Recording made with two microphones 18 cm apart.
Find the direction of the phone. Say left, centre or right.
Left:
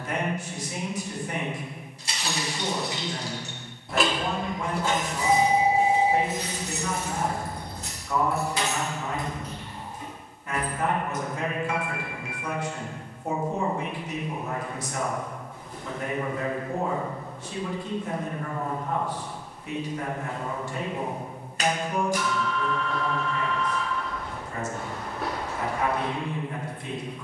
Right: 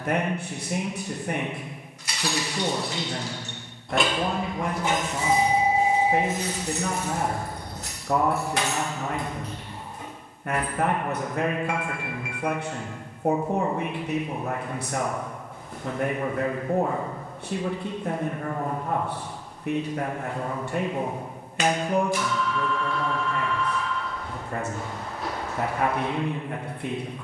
left.